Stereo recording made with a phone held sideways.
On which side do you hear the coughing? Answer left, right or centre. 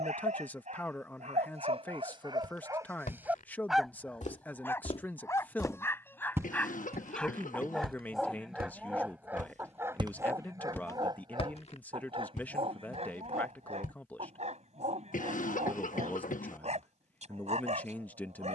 left.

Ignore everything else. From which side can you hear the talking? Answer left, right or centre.
centre.